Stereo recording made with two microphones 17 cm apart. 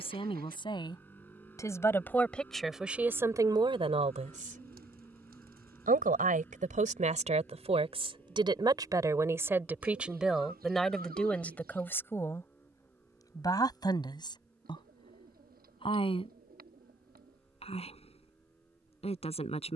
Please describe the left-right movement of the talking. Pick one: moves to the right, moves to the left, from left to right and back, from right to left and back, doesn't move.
from left to right and back.